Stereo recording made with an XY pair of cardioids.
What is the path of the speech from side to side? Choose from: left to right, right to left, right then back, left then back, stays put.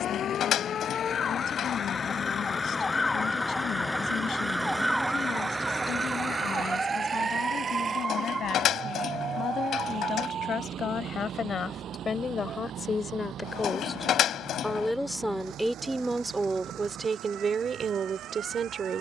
left to right.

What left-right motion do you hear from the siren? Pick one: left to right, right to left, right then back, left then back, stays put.
left to right.